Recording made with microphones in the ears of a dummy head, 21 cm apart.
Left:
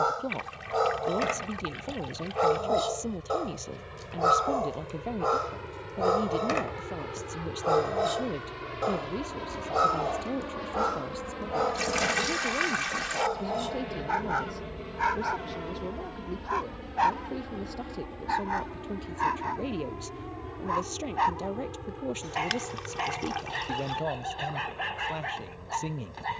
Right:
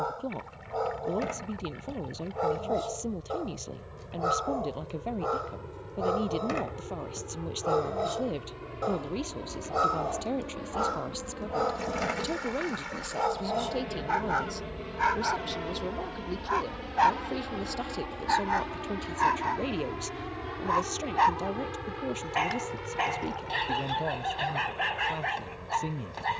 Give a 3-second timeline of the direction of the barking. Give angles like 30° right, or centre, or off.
50° left, 40° left, 30° left, 10° left, centre, 10° right, 20° right, 20° right, 20° right.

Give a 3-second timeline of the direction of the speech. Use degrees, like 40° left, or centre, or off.
10° left, centre, 20° right, 30° right, 40° right, 50° right, 30° right, 10° left, 10° left.